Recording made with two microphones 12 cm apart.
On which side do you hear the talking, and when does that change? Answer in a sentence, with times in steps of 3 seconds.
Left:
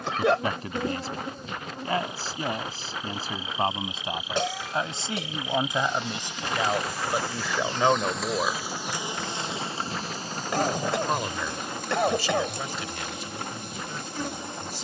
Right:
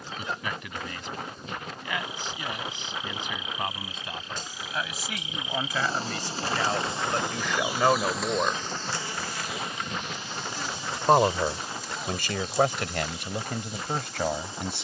In this clip you hear the talking on the left from 0 s, in the centre from 6 s and on the right from 9 s.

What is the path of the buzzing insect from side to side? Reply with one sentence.
You can hear the buzzing insect move from left to right and back again.